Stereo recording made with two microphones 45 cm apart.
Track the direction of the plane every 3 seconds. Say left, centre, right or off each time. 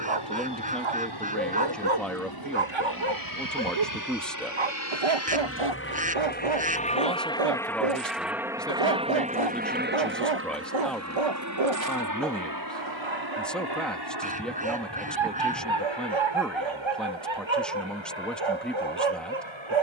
left, left, centre, right, right, right, right.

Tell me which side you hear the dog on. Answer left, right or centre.
right.